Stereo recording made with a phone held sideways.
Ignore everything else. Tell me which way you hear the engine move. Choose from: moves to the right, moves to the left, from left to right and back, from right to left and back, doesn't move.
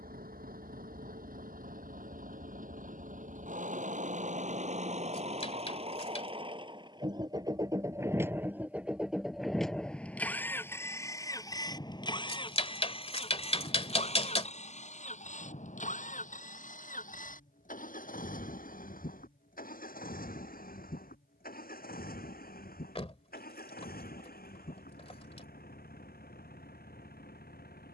moves to the left.